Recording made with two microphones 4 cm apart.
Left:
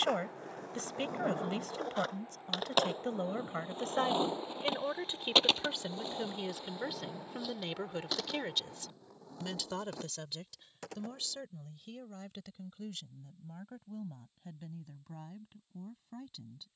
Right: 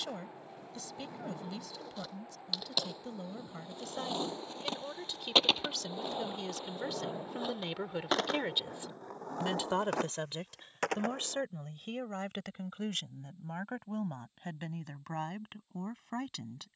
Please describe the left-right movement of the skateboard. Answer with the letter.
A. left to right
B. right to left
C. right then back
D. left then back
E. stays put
A.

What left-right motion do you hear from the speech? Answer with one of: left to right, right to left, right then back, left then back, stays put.
left to right.